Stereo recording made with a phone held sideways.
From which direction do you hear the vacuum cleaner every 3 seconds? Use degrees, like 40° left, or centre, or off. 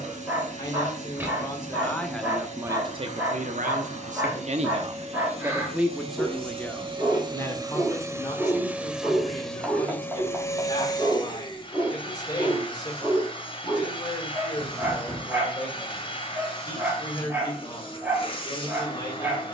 60° right, 50° right, 30° right, 20° left, 40° left, 40° left, 40° left.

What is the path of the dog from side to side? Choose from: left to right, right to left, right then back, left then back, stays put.
stays put.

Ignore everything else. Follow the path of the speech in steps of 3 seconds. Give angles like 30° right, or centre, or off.
10° left, 50° right, 20° left, 30° left, 30° left, 30° left, 30° left.